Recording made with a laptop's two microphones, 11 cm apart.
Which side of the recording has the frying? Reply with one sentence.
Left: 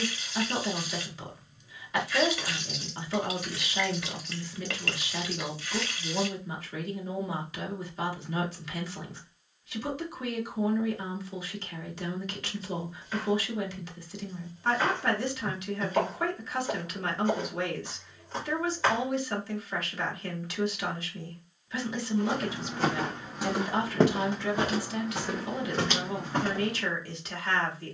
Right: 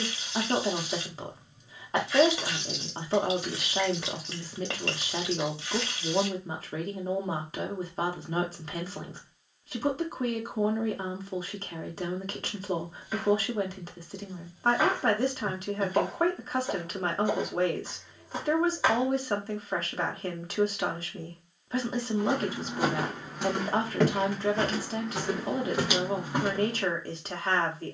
You can hear the frying on the right.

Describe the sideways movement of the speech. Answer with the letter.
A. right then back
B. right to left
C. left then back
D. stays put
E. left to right
D.